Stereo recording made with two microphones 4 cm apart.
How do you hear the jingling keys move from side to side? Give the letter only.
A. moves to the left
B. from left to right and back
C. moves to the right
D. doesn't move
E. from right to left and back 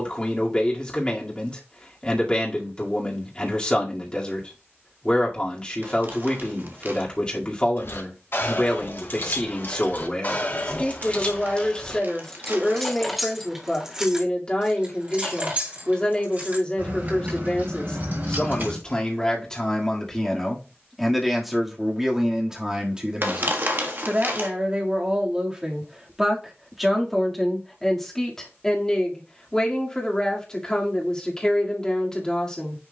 C.